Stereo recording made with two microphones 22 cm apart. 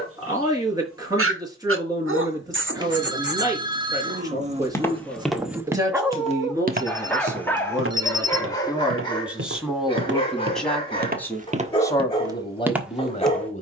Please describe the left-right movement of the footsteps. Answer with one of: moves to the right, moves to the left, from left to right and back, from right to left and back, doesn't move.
from left to right and back.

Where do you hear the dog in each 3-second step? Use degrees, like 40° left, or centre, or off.
70° right, 30° right, 10° left, 20° left, 20° left.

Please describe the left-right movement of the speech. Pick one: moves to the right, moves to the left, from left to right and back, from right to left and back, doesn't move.
moves to the left.